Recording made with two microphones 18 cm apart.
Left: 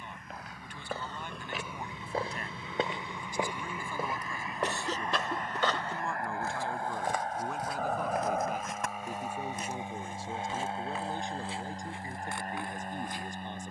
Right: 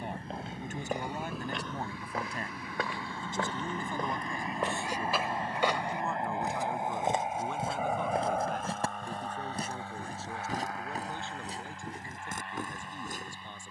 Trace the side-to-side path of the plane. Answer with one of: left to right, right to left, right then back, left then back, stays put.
right to left.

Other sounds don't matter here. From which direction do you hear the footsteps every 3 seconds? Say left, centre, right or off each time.
centre, centre, right, right, right.